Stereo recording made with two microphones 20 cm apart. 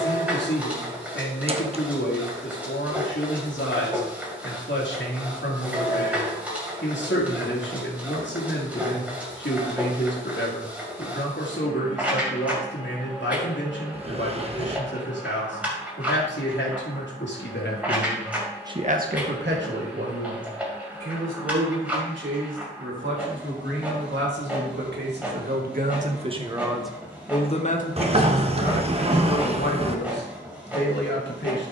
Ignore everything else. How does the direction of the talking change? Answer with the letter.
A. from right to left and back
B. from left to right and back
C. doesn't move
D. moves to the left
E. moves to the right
B.